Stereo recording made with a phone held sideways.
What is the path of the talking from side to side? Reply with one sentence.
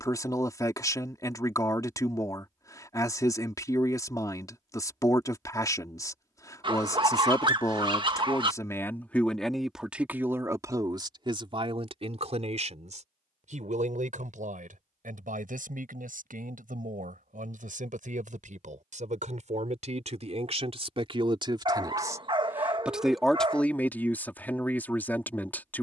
You can hear the talking move from left to right and back again.